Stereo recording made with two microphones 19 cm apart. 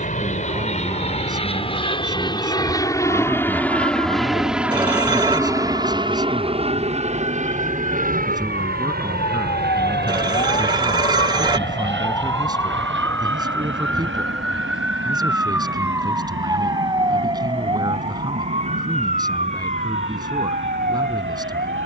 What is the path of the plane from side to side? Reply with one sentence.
You can hear the plane travel towards the right.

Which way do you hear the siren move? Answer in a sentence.
You can hear the siren move to the right.